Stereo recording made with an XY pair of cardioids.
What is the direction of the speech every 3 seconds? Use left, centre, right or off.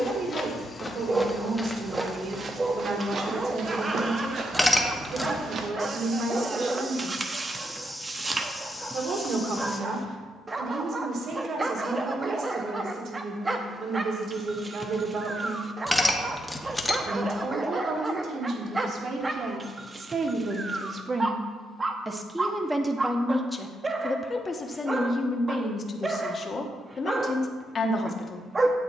right, right, right, right, right, right, right, centre, left, left.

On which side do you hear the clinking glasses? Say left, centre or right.
centre.